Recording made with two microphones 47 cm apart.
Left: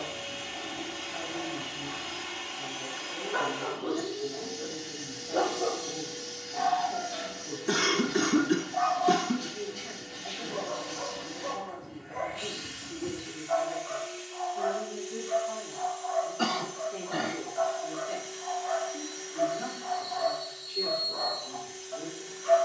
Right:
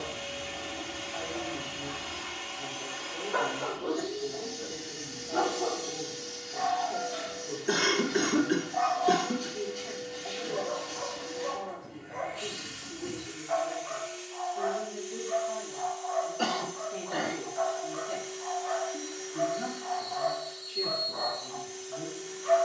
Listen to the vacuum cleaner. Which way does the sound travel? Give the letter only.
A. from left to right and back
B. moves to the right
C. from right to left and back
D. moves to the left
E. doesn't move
E.